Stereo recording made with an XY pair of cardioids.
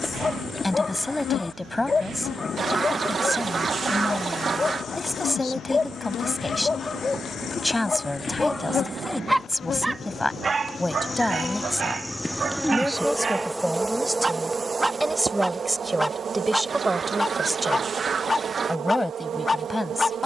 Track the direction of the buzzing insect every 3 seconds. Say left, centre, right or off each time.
left, left, left, left, centre, right, right.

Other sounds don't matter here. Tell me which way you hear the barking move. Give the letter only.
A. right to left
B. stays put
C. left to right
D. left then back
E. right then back
E.